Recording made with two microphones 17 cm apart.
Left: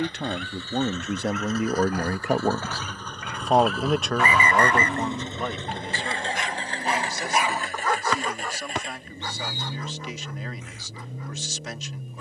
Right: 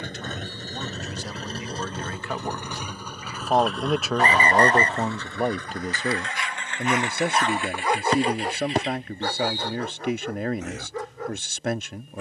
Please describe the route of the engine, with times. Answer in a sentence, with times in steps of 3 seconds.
You can hear the engine on the right from 0 s, in the centre from 3 s and on the left from 6 s.